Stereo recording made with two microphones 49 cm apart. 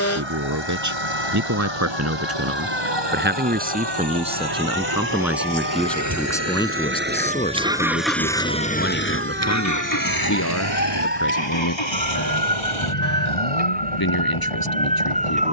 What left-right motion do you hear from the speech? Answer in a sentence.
You can hear the speech go from the right side to the left.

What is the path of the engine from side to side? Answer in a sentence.
You can hear the engine move to the left.